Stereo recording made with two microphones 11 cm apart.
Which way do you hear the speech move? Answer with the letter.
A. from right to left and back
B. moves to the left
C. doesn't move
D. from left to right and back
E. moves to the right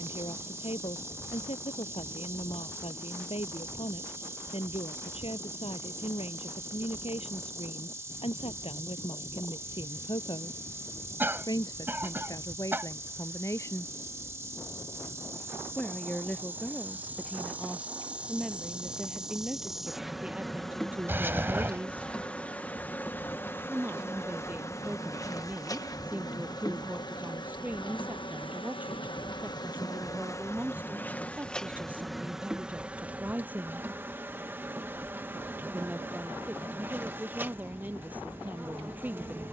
E.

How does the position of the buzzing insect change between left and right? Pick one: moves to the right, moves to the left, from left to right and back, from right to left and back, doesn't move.
from right to left and back.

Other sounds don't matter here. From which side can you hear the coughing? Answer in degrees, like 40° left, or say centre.
20° right.